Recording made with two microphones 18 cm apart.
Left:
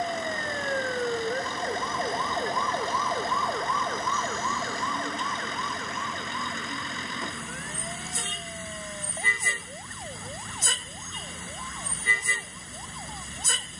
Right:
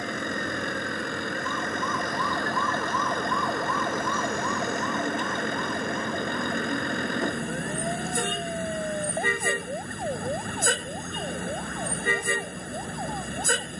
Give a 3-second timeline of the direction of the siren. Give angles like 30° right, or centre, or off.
40° left, 20° right, 40° right, 50° right, 60° right.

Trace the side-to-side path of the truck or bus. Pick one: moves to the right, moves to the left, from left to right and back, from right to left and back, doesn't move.
doesn't move.